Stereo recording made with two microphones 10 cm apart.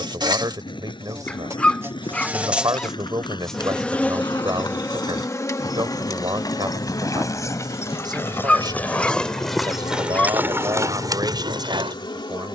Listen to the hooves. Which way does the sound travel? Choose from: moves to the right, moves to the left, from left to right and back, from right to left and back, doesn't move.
moves to the right.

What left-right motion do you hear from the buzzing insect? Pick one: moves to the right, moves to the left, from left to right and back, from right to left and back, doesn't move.
moves to the left.